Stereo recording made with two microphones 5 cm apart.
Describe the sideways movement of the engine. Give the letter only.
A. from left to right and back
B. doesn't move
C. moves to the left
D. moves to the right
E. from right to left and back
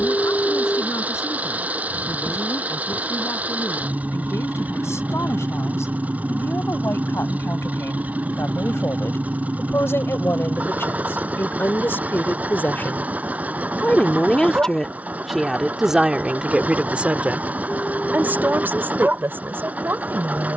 B.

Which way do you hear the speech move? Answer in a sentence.
In this clip you hear the speech move to the right.